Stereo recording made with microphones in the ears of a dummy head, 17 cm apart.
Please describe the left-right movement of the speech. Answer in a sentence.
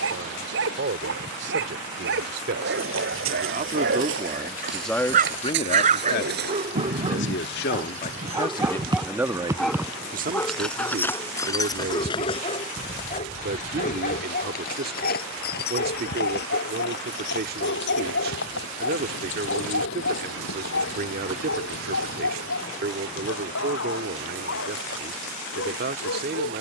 In this clip you hear the speech go left and come back.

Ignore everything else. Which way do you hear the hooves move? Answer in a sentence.
In this clip you hear the hooves move to the left.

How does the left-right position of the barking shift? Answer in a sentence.
In this clip you hear the barking move to the left.